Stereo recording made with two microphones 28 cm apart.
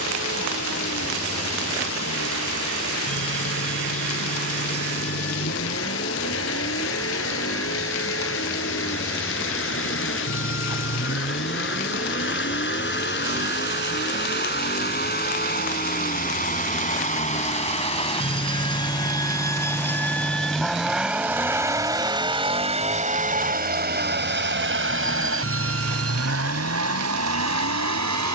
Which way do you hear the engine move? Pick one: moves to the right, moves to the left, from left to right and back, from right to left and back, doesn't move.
moves to the right.